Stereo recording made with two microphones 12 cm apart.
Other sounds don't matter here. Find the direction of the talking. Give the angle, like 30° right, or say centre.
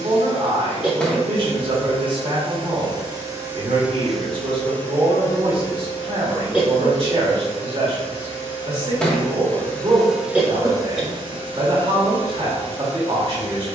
40° right.